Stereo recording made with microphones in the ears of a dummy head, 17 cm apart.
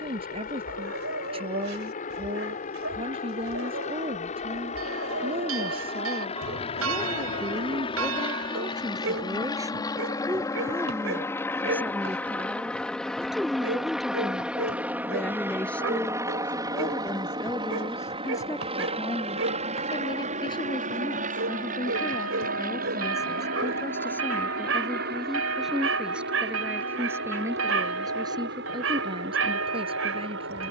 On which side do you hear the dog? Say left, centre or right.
right.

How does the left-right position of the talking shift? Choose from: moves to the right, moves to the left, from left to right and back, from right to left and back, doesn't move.
from right to left and back.